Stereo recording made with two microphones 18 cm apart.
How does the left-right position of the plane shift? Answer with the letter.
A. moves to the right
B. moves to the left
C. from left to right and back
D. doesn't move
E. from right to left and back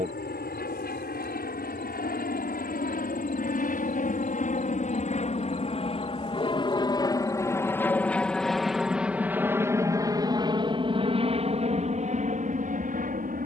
A.